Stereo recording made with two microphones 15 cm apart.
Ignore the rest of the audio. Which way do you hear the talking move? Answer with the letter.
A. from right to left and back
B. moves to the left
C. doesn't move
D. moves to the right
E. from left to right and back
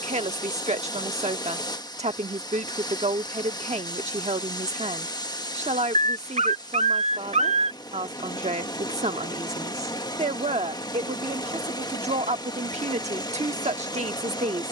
C.